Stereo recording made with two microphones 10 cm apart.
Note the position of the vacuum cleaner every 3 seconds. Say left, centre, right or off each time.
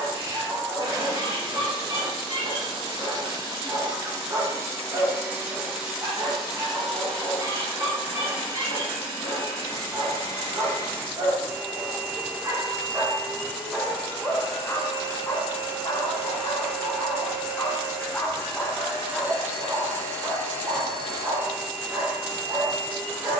right, right, centre, left, left, left, left, left.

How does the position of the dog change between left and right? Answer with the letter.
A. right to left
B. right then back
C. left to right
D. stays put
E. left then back
E.